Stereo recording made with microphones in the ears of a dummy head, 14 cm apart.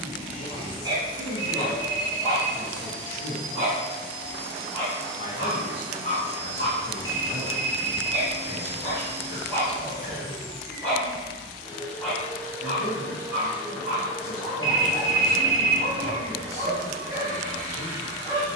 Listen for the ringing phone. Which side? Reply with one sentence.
In this clip you hear the ringing phone on the left.